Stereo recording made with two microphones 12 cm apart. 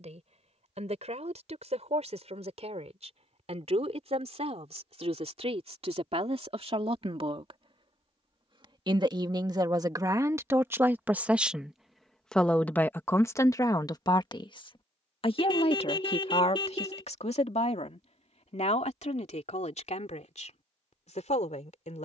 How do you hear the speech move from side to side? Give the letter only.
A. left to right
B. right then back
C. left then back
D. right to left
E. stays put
D.